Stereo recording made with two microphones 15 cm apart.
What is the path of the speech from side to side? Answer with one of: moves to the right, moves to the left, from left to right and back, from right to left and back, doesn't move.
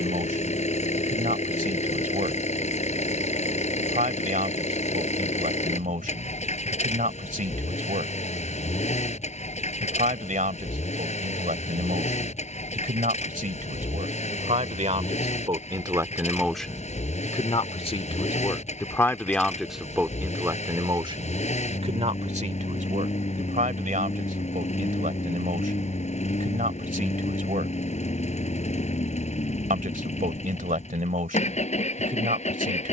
from right to left and back.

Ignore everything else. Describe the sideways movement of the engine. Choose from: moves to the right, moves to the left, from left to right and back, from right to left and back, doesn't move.
doesn't move.